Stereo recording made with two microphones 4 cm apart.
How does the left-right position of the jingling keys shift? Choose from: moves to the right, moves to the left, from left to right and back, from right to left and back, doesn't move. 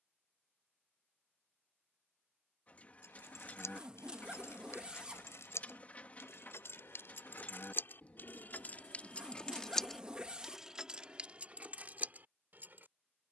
moves to the right.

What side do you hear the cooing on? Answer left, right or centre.
left.